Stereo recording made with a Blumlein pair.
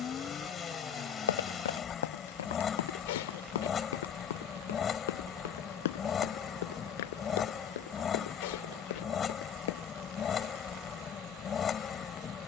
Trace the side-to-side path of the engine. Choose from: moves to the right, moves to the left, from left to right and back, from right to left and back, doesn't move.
doesn't move.